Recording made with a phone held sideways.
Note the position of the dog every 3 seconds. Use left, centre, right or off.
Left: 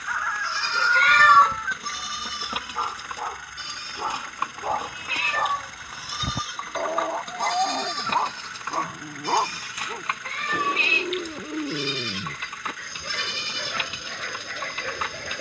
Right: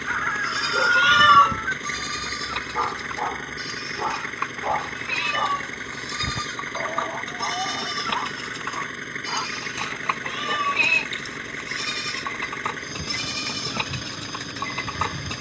right, centre, left, left, left.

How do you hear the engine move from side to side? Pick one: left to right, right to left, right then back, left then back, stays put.
stays put.